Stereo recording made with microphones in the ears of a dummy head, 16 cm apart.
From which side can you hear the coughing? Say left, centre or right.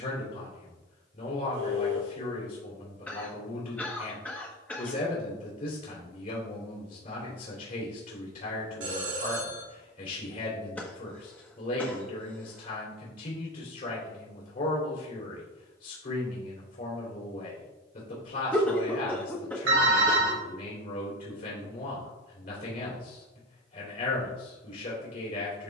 centre.